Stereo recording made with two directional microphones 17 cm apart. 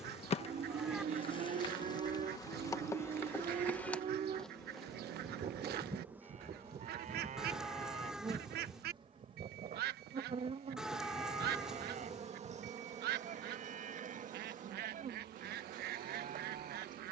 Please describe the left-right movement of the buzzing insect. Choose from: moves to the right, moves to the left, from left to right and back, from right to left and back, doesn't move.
moves to the right.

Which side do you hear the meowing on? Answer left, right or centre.
centre.